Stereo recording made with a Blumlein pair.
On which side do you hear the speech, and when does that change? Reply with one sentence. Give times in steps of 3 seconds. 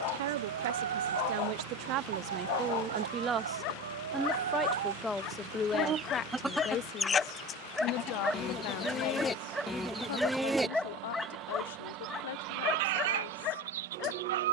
In this clip you hear the speech on the right from 0 s, in the centre from 3 s and on the left from 6 s.